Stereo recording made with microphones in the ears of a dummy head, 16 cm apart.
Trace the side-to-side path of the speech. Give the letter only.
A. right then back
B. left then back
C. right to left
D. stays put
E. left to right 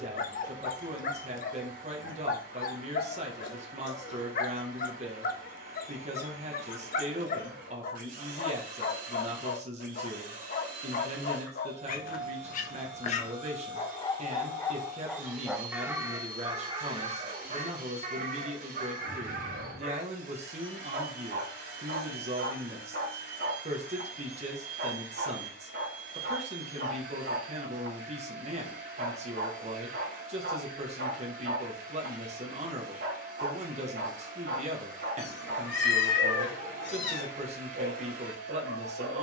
D.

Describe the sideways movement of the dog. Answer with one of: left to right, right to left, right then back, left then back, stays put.
left to right.